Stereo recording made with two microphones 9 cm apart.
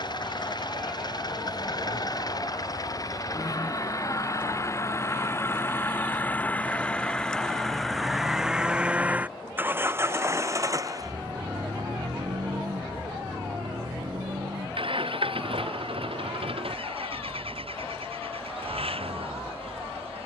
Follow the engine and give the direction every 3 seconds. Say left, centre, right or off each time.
left, left, centre, right, right, right, right.